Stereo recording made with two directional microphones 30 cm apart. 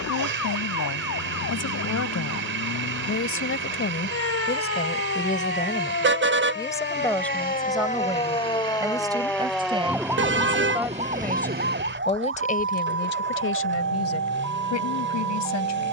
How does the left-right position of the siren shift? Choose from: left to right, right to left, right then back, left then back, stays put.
left to right.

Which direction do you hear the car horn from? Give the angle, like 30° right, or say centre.
40° right.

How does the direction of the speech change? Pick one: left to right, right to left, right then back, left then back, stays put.
right then back.